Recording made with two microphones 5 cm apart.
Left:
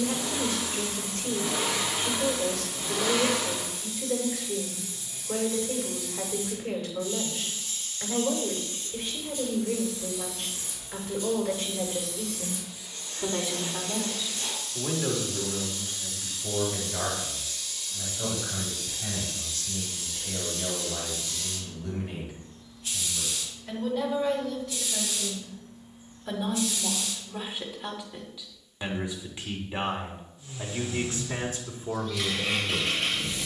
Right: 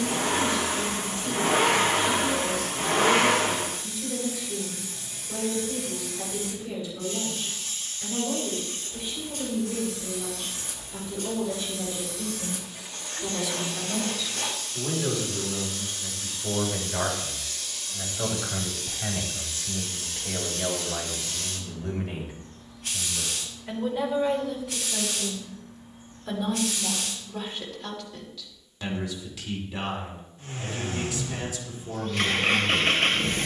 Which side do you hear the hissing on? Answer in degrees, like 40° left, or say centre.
60° right.